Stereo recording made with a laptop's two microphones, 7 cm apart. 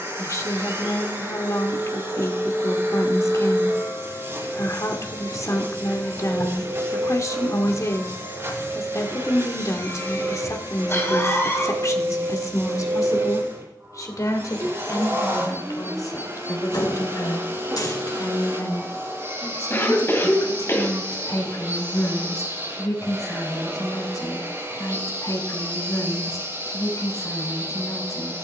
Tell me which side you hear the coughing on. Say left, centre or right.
left.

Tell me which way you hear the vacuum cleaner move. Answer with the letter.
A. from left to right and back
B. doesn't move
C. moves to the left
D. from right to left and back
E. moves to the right
B.